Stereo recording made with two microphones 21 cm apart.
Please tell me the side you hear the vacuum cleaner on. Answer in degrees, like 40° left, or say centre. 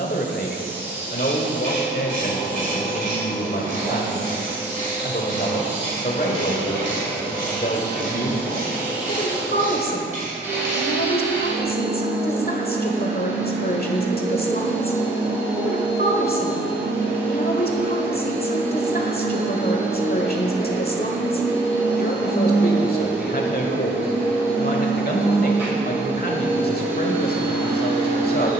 10° right.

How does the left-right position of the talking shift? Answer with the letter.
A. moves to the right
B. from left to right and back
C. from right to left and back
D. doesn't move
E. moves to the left
D.